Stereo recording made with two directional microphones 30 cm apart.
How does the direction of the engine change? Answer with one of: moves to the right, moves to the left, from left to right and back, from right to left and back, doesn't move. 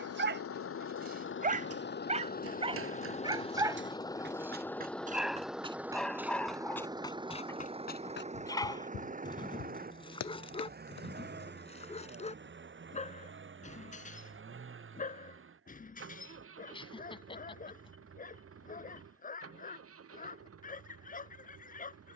moves to the right.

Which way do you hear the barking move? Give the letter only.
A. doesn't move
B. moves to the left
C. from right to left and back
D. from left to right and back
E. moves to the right
B.